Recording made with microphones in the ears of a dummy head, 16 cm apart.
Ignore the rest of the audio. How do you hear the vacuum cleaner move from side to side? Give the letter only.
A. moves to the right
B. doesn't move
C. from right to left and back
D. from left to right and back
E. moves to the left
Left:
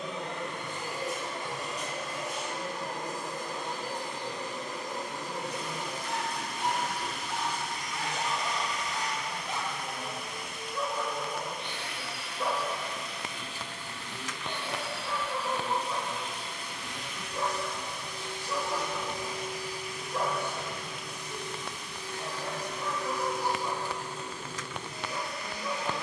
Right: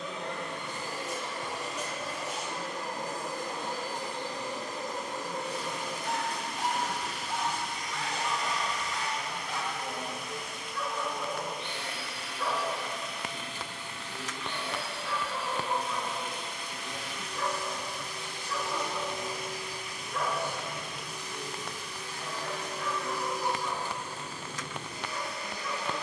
B.